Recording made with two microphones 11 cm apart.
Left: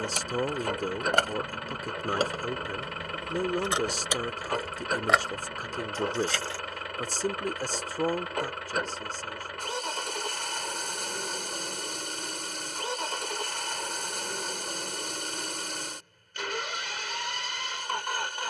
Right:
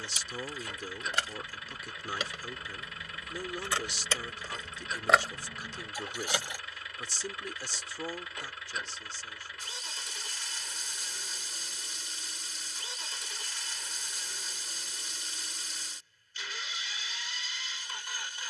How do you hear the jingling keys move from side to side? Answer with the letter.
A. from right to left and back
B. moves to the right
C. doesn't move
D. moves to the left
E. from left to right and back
B.